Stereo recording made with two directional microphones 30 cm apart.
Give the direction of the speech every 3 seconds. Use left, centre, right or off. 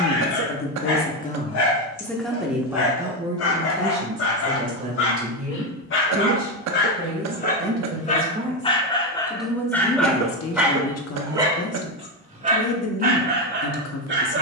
left, right, right, left, left.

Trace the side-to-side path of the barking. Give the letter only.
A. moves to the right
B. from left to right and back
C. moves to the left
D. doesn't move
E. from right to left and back
A.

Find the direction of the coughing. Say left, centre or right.
right.